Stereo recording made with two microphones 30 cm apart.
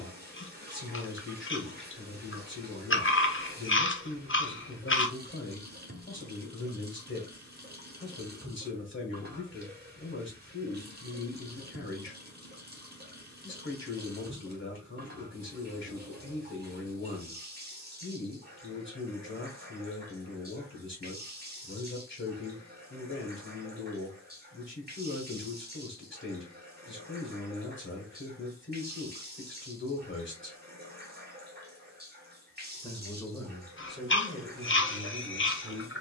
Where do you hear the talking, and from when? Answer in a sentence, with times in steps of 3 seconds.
You can hear the talking on the left from 0 s and in the centre from 33 s.